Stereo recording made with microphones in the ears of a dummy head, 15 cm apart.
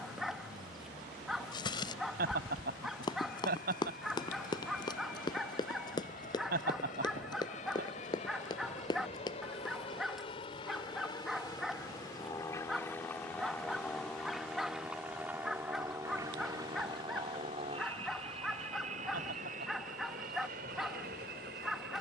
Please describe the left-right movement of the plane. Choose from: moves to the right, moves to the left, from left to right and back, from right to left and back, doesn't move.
moves to the right.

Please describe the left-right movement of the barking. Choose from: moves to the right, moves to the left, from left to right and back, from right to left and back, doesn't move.
doesn't move.